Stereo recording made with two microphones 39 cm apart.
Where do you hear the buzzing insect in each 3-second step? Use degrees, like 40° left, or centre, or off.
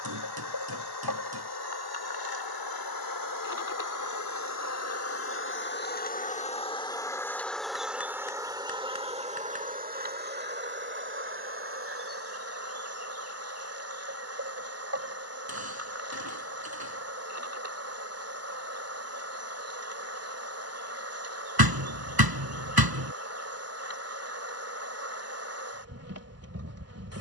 60° left, 40° left, centre, 20° right, 40° right, 40° right, 40° right, 40° right, 40° right.